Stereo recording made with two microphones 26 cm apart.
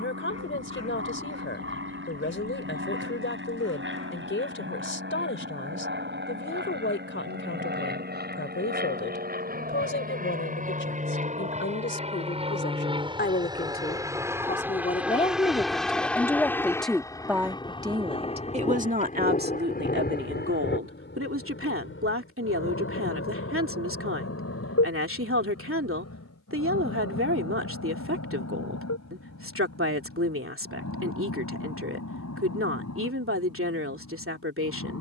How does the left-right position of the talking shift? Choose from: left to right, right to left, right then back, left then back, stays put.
left to right.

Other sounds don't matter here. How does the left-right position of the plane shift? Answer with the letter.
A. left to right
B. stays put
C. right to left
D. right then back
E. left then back
C.